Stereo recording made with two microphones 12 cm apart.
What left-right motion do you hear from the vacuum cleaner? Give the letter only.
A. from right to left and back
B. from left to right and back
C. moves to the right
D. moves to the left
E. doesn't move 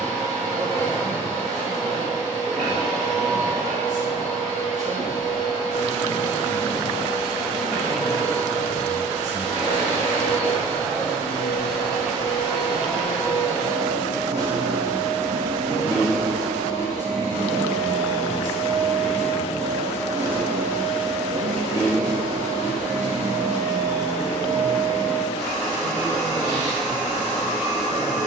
E.